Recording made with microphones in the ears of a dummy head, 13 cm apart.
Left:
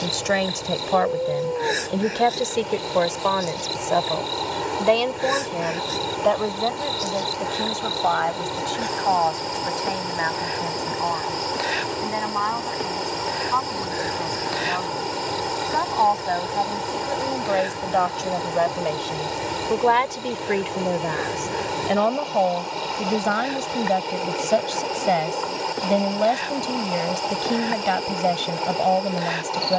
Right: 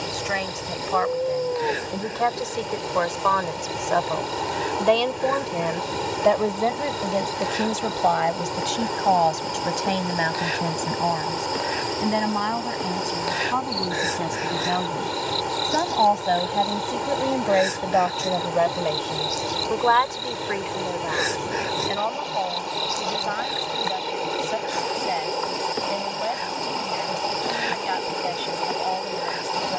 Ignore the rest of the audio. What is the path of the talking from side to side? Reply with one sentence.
You can hear the talking move from left to right and back again.